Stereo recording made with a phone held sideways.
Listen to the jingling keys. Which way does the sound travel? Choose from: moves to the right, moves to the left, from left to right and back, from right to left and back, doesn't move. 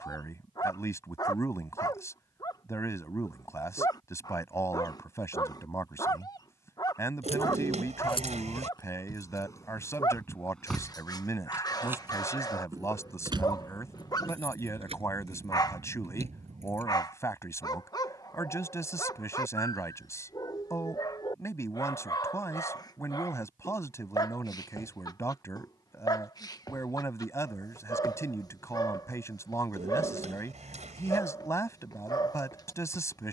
moves to the right.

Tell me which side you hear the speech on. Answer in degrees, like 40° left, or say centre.
20° left.